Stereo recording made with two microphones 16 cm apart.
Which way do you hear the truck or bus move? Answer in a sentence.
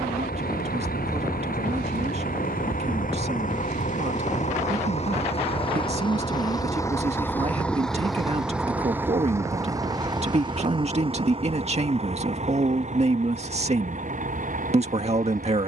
In this clip you hear the truck or bus move from left to right.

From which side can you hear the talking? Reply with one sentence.
You can hear the talking on the right.